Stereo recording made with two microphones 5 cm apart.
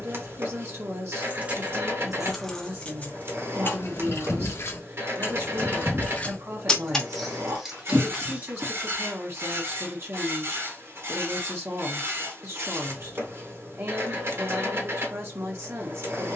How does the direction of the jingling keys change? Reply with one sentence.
You can hear the jingling keys go left and come back.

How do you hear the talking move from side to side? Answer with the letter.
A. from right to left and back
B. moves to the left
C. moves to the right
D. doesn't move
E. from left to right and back
D.